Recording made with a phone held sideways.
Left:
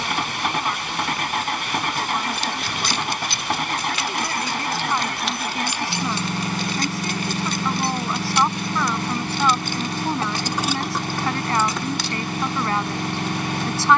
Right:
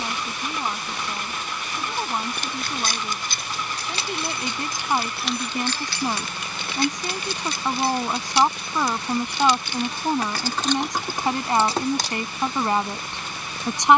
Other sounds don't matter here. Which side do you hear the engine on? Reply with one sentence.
You can hear the engine on the left.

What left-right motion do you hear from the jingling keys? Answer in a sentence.
In this clip you hear the jingling keys go left and come back.